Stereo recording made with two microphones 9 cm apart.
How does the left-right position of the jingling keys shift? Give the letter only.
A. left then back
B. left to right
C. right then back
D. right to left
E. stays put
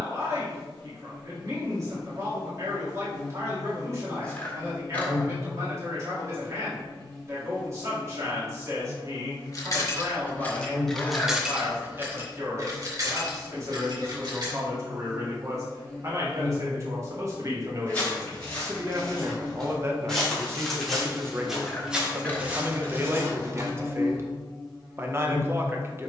B.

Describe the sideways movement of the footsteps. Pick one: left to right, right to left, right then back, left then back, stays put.
left to right.